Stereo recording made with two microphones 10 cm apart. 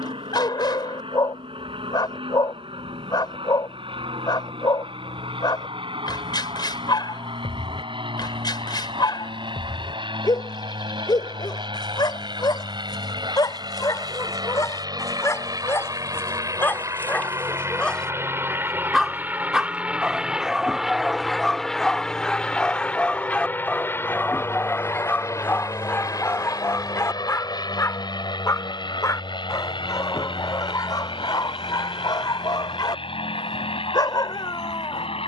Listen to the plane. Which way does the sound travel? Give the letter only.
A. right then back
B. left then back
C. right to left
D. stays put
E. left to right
C.